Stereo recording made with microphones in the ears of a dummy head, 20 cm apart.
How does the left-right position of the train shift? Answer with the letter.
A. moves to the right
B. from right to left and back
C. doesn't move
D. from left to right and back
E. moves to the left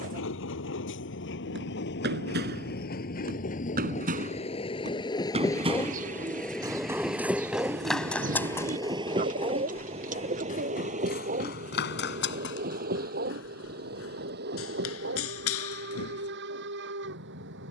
A.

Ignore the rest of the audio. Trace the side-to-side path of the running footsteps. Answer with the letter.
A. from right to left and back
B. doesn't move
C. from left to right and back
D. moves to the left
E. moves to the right
D.